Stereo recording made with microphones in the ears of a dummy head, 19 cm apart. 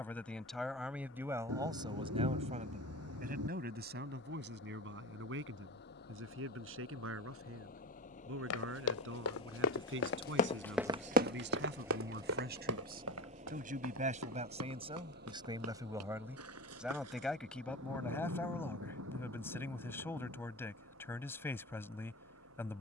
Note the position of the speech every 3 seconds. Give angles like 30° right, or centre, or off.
20° right, 60° right, 70° right, 60° right, 40° right, 10° right, 10° left, 10° left.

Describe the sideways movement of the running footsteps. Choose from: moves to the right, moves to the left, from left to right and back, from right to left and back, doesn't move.
moves to the right.